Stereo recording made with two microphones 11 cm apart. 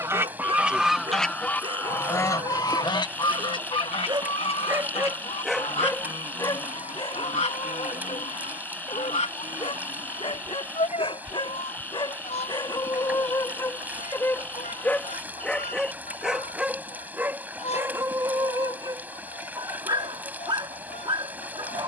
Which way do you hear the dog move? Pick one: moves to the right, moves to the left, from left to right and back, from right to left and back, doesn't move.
from right to left and back.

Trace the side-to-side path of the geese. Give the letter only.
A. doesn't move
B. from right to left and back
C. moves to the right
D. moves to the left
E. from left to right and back
D.